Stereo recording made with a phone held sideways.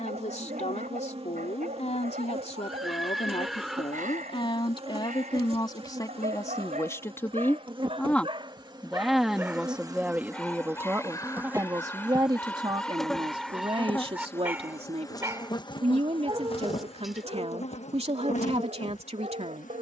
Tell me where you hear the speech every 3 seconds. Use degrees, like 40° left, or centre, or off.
50° left, 30° left, 10° left, 10° right, 40° right, 40° right, 40° right.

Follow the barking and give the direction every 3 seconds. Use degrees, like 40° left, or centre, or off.
60° right, 60° right, 50° right, 10° left, centre, 30° right, 50° right.